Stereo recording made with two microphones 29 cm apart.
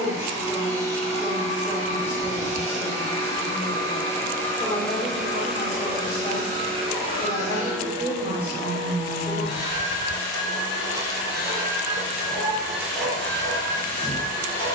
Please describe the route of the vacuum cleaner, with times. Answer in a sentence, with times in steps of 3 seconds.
You can hear the vacuum cleaner on the left from 0 s, in the centre from 3 s, on the right from 6 s and in the centre from 12 s.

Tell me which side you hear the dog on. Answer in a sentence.
You can hear the dog in the centre.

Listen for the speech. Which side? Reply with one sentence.
In this clip you hear the speech in the centre.